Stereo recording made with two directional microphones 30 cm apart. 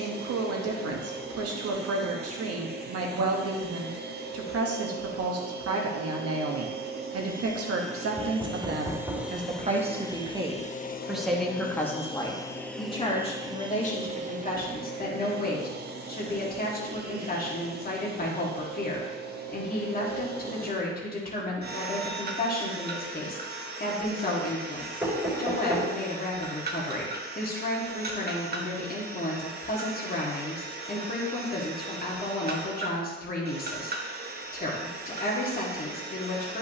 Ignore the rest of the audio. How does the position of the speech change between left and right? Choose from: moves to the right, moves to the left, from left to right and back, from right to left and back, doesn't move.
moves to the left.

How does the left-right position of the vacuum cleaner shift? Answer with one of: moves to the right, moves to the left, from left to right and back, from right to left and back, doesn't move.
from right to left and back.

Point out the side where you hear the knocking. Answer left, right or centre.
centre.